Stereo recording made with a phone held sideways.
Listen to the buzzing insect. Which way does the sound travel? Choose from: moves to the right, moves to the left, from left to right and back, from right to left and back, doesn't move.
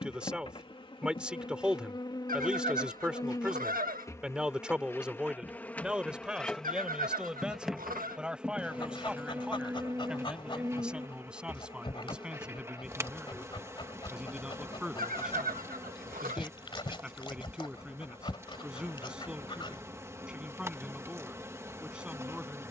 moves to the right.